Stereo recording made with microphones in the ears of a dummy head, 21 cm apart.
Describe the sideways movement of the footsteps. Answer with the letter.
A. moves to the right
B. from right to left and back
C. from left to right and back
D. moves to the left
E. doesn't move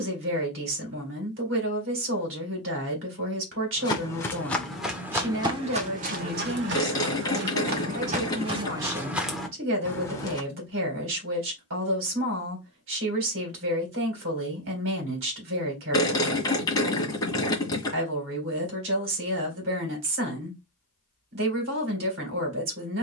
C.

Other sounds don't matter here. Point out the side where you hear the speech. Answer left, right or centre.
right.